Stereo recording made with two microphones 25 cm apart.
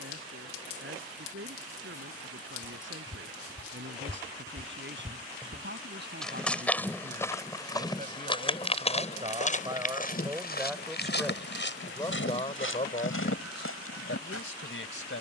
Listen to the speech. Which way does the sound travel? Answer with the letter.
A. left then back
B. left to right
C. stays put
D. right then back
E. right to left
E.